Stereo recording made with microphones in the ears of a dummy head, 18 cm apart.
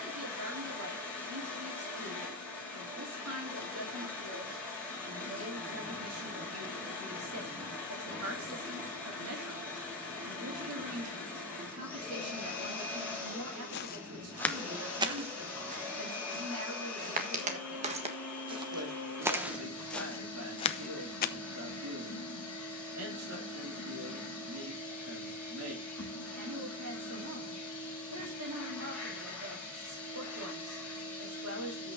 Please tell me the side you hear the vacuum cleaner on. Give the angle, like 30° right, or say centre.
10° left.